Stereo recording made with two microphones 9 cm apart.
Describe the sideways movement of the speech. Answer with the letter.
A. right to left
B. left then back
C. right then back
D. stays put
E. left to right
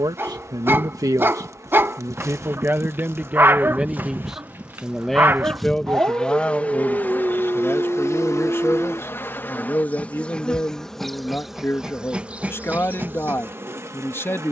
A.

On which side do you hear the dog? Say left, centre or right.
right.